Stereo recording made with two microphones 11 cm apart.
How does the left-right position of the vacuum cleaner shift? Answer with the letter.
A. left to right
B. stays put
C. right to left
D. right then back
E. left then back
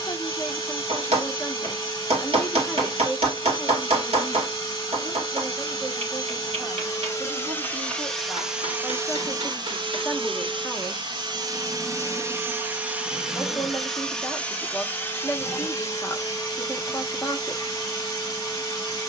D.